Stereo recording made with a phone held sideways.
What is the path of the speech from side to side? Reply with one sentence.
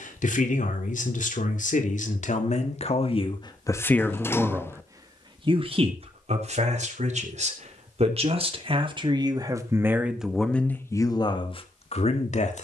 You can hear the speech move from left to right and back again.